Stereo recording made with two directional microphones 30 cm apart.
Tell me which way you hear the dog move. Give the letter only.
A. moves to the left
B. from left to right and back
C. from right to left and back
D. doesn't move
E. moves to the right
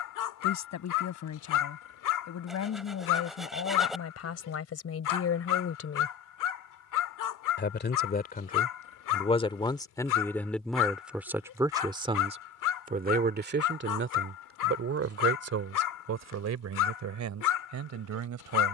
D.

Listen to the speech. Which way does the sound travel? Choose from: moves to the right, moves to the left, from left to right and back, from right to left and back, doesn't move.
moves to the right.